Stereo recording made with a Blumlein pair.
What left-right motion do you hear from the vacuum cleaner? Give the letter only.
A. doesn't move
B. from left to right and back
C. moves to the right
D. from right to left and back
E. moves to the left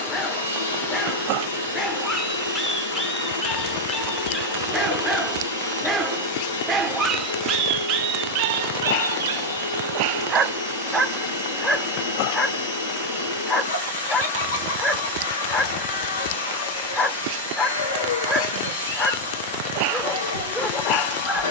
A.